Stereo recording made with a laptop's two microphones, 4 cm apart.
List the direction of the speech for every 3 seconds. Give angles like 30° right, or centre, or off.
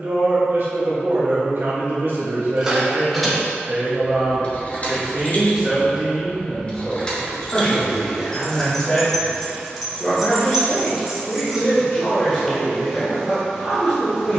50° right, 20° right, 10° left, 30° left, 30° left.